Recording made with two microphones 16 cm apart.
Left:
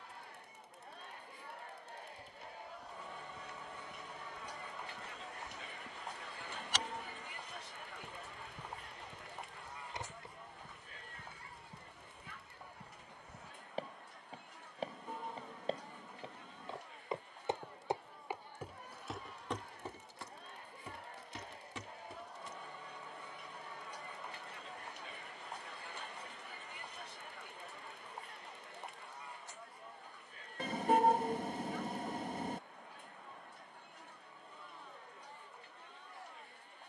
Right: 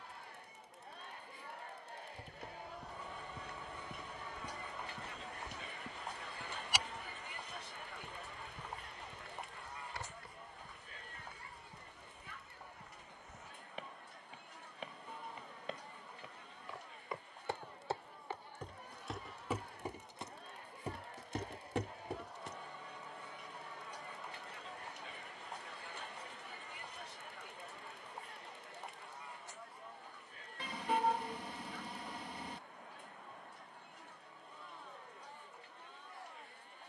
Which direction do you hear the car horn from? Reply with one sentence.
In this clip you hear the car horn on the left.